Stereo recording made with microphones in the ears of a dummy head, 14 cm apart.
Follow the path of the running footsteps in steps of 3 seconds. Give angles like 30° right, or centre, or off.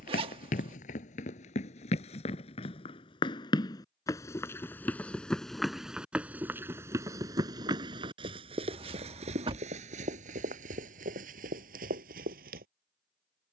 40° left, 10° left, 20° right, 50° right, 60° right.